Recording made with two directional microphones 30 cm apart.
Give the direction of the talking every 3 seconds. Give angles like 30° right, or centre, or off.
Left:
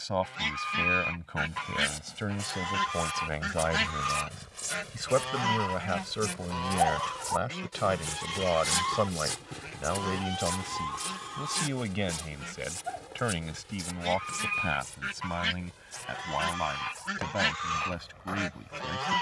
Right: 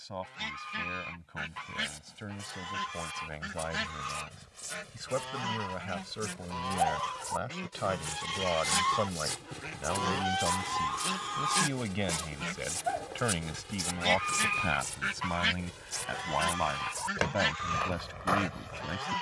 60° left, 50° left, 30° left, 20° left, centre, 10° right, 10° right.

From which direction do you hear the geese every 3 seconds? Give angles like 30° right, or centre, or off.
30° left, 30° left, 10° left, 30° right, 40° right, centre, 30° left.